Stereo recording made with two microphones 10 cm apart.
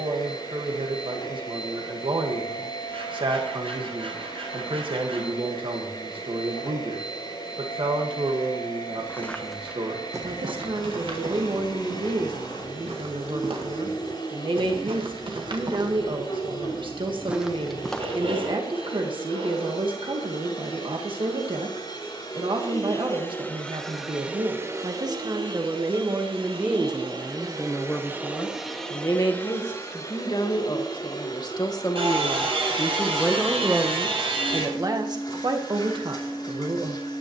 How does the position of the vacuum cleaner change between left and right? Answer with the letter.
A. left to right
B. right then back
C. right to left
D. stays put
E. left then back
B.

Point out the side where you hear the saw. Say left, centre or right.
right.